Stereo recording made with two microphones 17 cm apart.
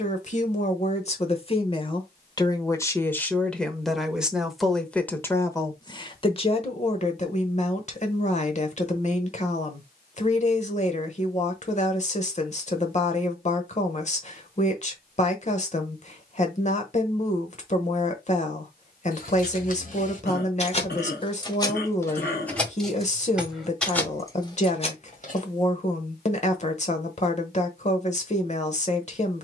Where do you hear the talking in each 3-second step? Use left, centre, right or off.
left, centre, left, left, left, left, left, left, left, left.